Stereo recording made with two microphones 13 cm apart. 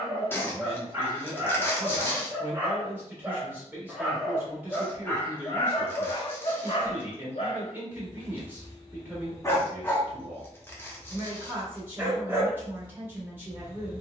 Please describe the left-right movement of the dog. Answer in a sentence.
You can hear the dog move from right to left and back again.